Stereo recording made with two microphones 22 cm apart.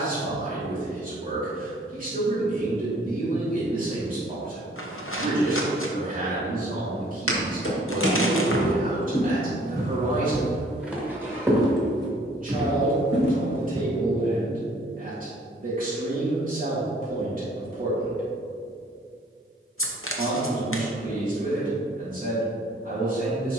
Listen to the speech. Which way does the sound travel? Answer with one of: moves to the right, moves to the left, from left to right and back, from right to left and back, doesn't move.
doesn't move.